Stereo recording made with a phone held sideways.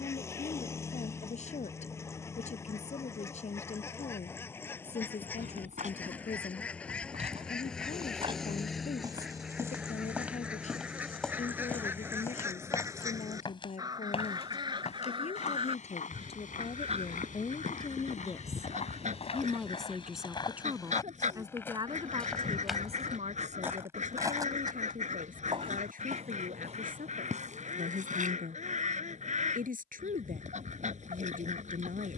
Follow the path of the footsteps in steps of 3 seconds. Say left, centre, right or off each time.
off, right, right, centre, left, left, left, centre, right, right, off.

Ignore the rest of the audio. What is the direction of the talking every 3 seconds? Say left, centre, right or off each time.
left, left, left, left, left, left, centre, right, right, right, right.